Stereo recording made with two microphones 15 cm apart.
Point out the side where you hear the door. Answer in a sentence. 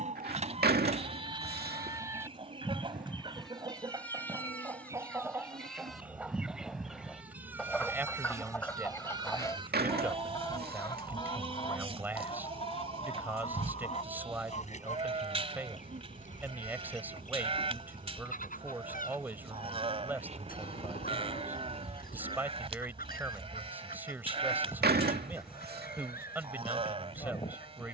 In this clip you hear the door on the right.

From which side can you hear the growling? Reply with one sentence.
In this clip you hear the growling on the right.